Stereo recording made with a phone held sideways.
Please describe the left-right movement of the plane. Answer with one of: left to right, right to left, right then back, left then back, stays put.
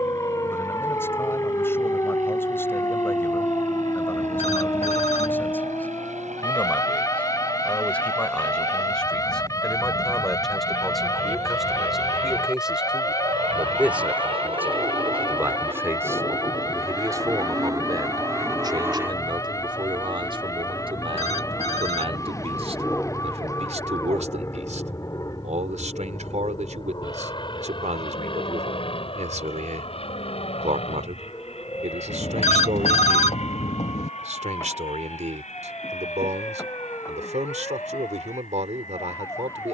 right to left.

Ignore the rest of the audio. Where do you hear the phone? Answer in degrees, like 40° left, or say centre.
50° left.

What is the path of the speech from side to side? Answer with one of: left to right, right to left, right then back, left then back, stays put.
left to right.